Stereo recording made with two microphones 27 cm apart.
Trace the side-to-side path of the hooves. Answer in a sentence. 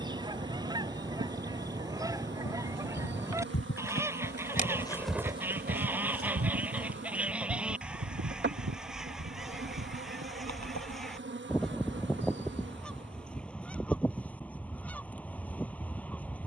You can hear the hooves move from left to right.